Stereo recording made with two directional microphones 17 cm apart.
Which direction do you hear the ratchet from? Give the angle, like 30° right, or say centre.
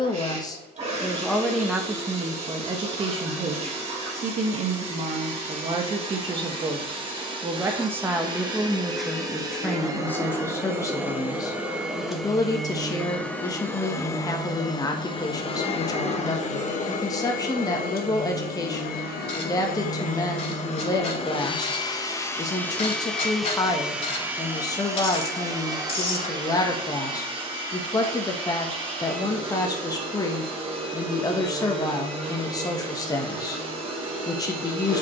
40° left.